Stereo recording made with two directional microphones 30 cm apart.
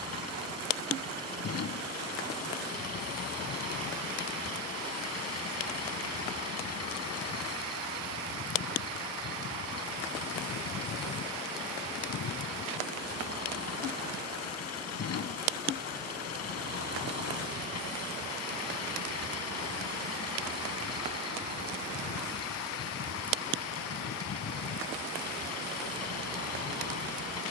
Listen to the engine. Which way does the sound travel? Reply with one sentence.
In this clip you hear the engine stay in one place.